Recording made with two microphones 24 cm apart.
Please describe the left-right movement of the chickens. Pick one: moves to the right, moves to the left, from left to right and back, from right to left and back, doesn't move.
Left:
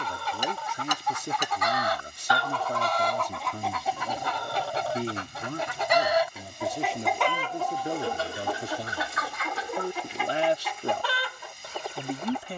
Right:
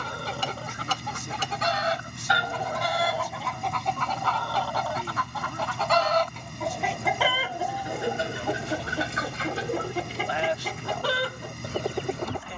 from right to left and back.